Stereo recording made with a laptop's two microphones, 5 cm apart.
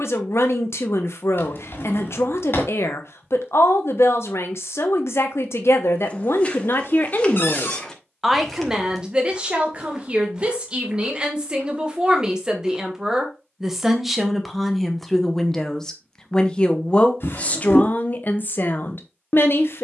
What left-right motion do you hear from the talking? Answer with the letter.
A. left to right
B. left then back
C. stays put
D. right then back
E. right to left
D.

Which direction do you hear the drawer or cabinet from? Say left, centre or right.
left.